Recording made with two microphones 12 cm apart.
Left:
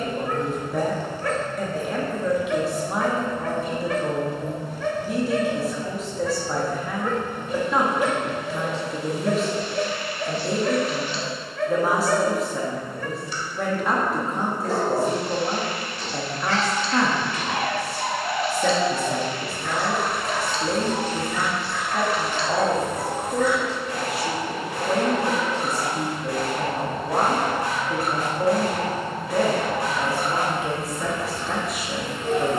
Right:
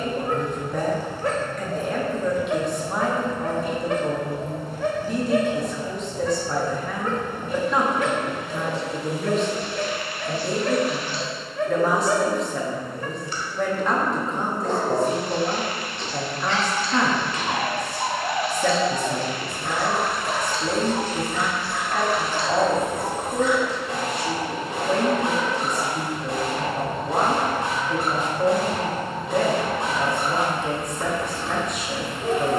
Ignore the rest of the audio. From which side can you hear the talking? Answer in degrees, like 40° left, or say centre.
centre.